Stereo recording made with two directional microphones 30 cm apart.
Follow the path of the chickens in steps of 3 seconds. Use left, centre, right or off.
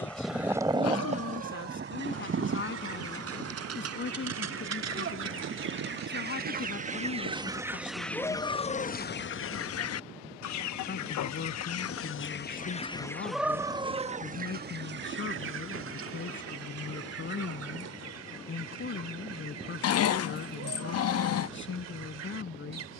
right, right, centre, left, centre, right, right, right.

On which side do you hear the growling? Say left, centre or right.
left.